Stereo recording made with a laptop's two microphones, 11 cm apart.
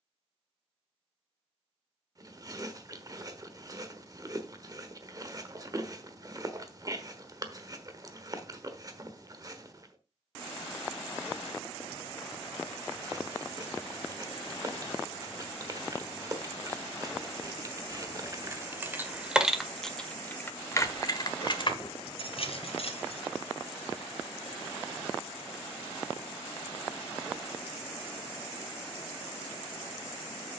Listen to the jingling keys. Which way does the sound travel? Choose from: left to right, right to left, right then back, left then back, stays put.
right to left.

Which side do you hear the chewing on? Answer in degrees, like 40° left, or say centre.
30° right.